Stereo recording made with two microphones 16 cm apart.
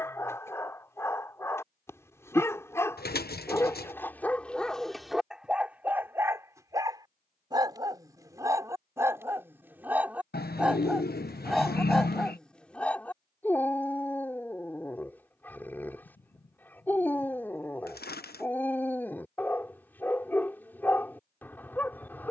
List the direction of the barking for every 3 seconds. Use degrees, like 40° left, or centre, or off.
20° left, centre, 20° right, 10° right, 10° left, 10° left, 10° left, 10° left.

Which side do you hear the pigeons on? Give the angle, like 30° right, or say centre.
70° left.